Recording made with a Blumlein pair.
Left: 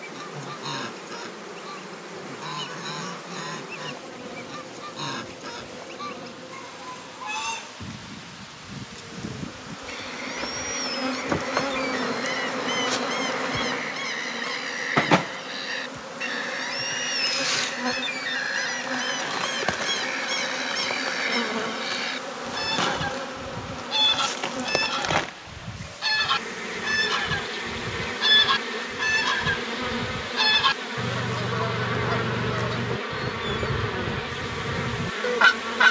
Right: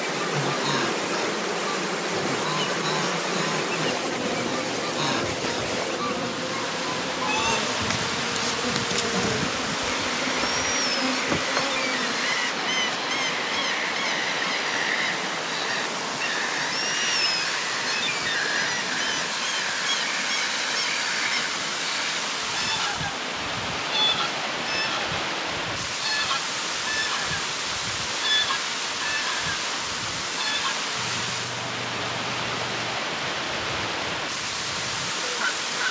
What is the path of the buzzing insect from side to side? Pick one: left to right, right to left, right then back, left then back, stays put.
right to left.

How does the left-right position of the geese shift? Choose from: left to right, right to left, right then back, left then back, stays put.
right to left.